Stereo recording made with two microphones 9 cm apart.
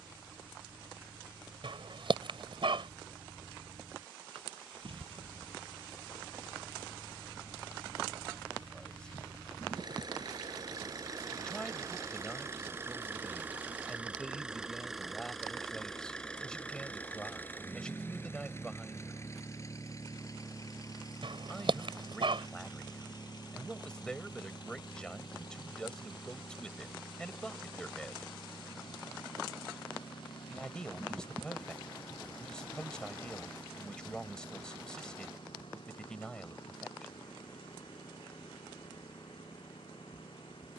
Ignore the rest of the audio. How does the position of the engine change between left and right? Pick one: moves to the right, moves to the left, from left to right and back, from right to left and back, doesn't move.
moves to the left.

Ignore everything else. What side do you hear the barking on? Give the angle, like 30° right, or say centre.
70° right.